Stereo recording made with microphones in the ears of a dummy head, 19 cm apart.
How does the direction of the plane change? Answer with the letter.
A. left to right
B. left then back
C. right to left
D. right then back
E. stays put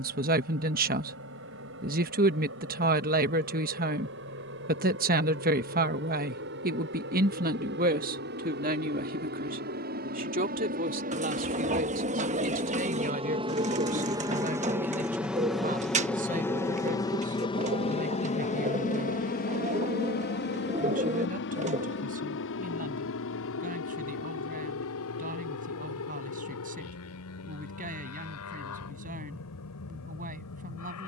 C.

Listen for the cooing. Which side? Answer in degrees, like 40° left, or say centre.
30° right.